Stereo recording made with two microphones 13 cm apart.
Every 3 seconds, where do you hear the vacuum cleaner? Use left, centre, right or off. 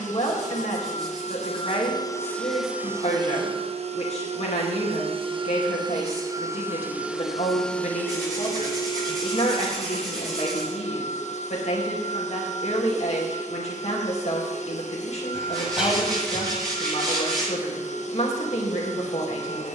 left, right, centre, left, left, left, left.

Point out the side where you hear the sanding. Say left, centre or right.
right.